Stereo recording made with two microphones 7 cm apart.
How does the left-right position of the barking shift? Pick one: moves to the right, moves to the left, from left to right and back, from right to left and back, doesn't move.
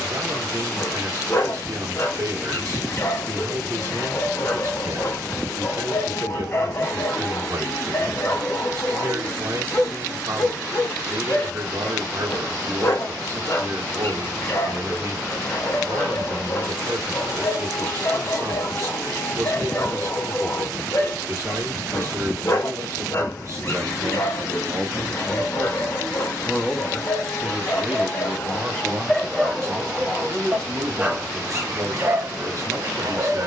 moves to the right.